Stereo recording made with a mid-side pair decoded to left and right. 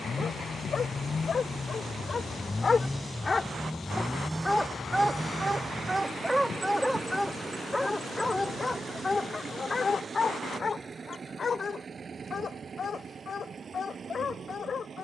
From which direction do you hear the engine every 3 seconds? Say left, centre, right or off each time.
left, centre, right, right, right.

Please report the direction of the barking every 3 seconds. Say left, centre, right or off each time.
left, centre, centre, left, left.